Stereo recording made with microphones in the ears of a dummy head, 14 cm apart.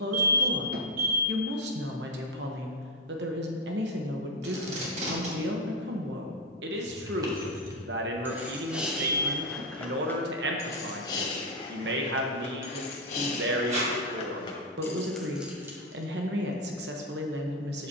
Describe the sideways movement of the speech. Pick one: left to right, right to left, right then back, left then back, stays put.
stays put.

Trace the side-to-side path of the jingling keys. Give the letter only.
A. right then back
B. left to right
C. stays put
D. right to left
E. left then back
E.